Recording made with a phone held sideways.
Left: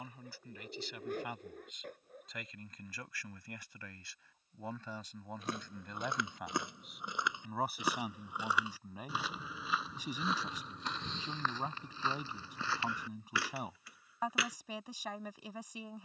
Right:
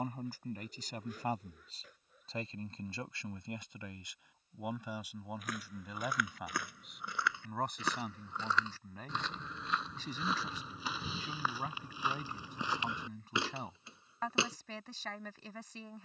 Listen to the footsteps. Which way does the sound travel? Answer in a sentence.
In this clip you hear the footsteps move to the right.